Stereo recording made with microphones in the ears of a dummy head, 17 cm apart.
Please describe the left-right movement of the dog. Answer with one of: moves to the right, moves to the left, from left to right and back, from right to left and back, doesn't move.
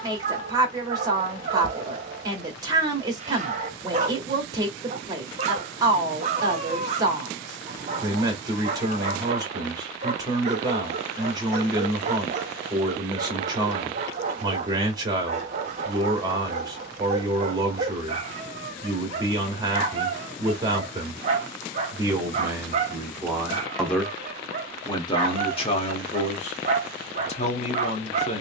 doesn't move.